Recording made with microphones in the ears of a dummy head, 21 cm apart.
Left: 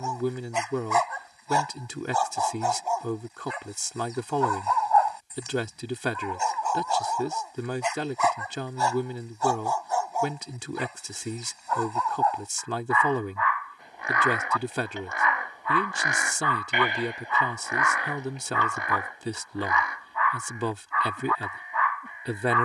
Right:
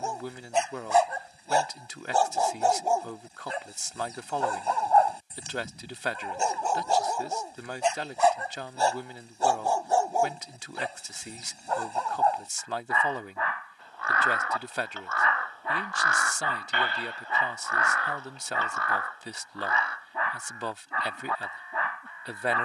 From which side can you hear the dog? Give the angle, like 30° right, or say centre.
30° right.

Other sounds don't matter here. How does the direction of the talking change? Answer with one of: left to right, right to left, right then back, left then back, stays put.
stays put.